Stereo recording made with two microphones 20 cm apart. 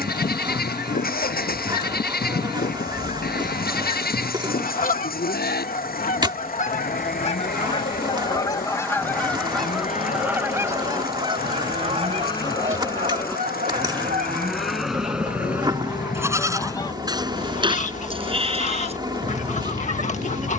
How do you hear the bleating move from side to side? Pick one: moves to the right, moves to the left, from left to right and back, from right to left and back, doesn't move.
moves to the right.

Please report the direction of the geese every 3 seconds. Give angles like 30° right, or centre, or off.
50° left, 50° left, 30° left, 10° right, 40° right, 10° left, 40° left.